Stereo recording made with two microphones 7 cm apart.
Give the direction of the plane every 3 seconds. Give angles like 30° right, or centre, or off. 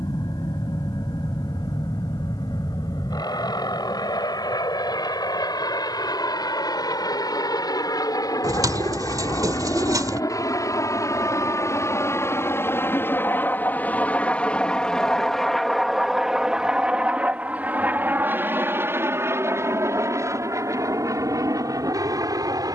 80° left, 70° left, 60° left, 50° left, 20° left, 10° right, 30° right, 50° right.